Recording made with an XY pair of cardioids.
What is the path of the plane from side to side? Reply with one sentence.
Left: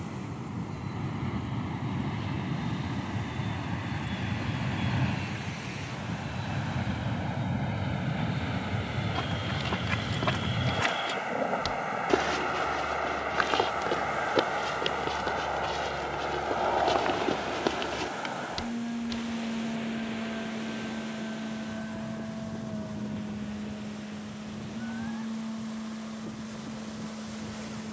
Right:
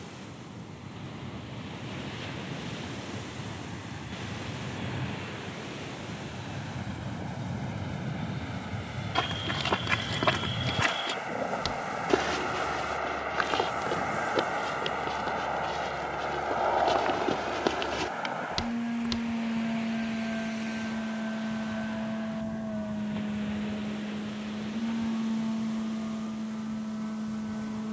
In this clip you hear the plane travel towards the right.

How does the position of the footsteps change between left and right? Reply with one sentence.
In this clip you hear the footsteps move from right to left and back again.